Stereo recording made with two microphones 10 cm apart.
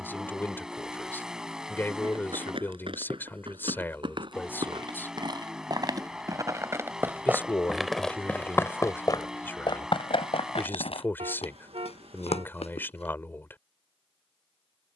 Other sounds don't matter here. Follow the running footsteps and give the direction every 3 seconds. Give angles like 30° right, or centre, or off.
60° right, 50° right, 10° right, 60° left, 80° left.